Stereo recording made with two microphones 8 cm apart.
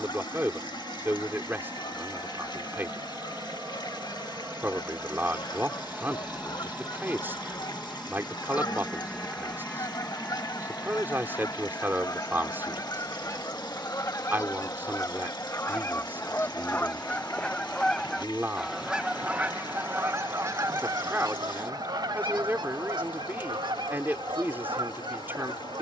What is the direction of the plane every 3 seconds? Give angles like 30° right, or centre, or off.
40° right, 30° right, 10° right, 10° left, 30° left, 40° left, 50° left, 50° left, 60° left.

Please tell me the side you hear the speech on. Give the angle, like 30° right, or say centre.
30° right.